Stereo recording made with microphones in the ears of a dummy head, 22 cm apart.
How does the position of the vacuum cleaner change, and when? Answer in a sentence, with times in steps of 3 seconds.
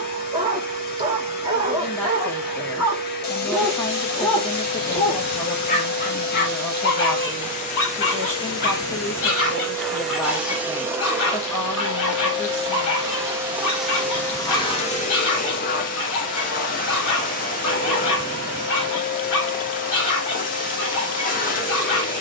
In this clip you hear the vacuum cleaner on the left from 0 s, in the centre from 9 s and on the left from 15 s.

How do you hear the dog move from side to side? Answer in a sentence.
You can hear the dog move from right to left.